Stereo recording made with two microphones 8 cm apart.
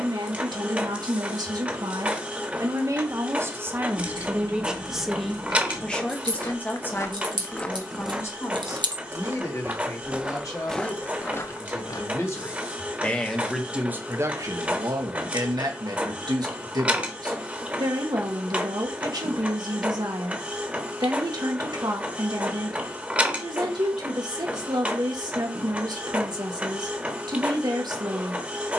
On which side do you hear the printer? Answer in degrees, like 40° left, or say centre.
20° right.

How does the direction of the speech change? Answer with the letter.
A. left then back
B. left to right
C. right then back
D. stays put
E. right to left
A.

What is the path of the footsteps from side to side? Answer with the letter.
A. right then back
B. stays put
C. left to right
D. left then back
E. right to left
A.